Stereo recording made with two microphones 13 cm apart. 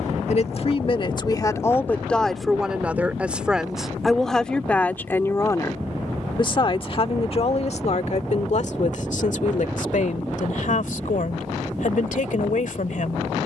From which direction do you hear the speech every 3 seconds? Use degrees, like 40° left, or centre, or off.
20° left, 10° left, 50° left, 70° left, 70° left.